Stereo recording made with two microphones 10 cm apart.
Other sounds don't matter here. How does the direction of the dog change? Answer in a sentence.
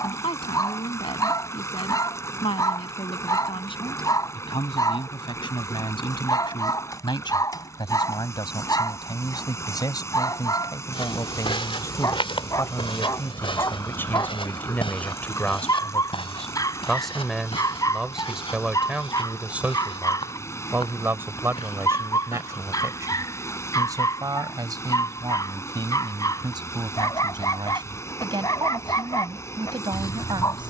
In this clip you hear the dog stay put.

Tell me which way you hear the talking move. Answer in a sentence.
In this clip you hear the talking move from left to right.